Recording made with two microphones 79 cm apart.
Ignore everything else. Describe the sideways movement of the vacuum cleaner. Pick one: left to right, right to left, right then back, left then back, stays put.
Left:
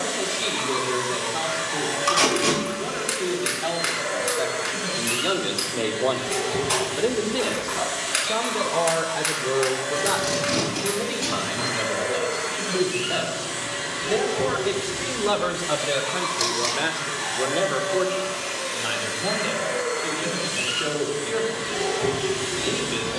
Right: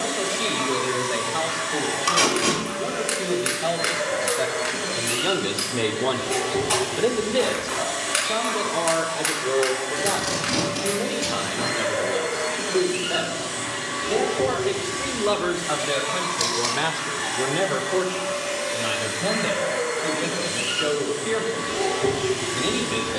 stays put.